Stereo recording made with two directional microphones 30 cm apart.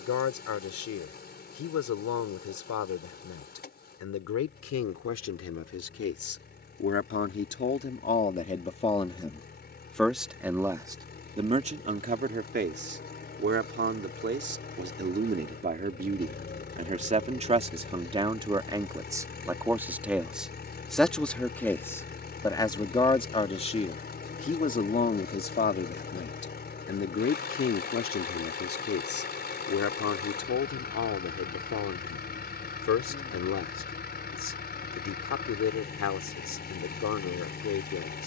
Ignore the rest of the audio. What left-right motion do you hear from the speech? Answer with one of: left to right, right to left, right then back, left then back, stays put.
right then back.